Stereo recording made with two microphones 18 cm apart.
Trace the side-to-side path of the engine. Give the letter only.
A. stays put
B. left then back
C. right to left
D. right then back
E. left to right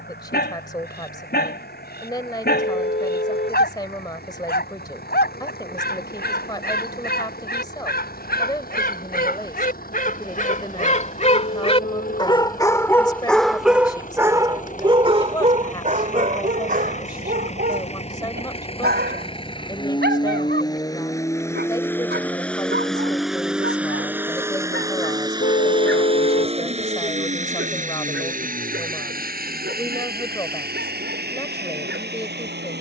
E.